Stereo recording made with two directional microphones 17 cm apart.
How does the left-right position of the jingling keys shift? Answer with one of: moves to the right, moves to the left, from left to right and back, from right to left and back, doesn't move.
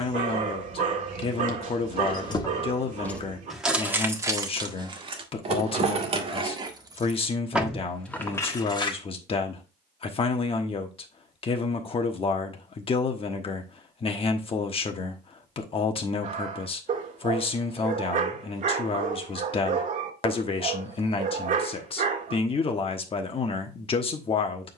from left to right and back.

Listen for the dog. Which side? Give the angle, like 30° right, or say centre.
50° right.